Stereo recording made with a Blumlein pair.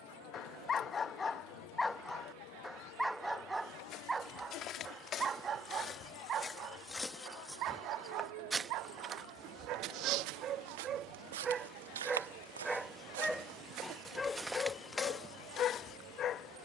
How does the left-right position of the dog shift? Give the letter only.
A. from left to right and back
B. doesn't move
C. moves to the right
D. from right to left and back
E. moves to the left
A.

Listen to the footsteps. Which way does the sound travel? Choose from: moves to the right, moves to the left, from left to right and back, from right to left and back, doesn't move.
from left to right and back.